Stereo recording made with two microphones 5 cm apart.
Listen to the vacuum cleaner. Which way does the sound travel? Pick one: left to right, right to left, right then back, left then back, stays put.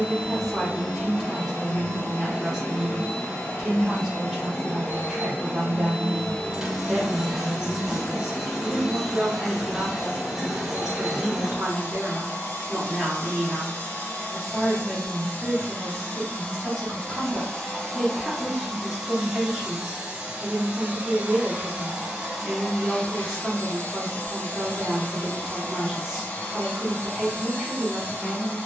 right then back.